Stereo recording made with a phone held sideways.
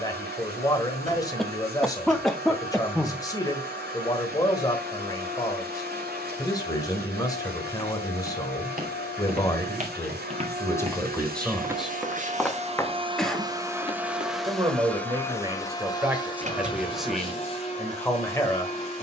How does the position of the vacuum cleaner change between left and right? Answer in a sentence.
You can hear the vacuum cleaner travel towards the left.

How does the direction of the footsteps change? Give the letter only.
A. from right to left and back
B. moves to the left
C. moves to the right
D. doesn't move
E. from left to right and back
B.